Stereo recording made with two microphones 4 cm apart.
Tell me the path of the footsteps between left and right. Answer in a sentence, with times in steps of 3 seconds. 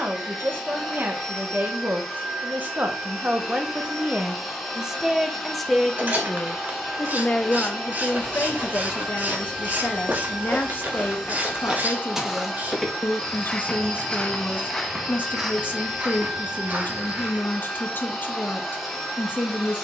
In this clip you hear the footsteps not at all from 0 s, on the right from 6 s, in the centre from 12 s, on the right from 15 s and not at all from 18 s.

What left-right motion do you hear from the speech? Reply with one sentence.
You can hear the speech travel towards the left.